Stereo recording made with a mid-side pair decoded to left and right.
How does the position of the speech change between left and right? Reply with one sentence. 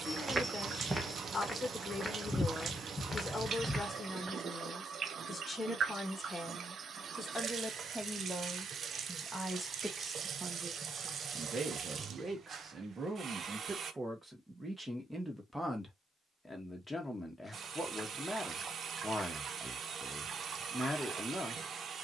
In this clip you hear the speech move from left to right and back again.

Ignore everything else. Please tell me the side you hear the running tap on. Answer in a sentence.
In this clip you hear the running tap on the right.